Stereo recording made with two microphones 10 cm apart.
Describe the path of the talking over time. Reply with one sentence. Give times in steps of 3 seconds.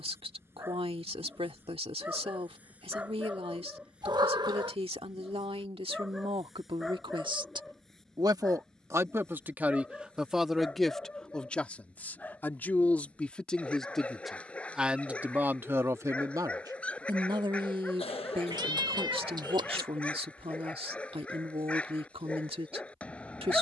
In this clip you hear the talking on the right from 0 s, in the centre from 9 s and on the right from 15 s.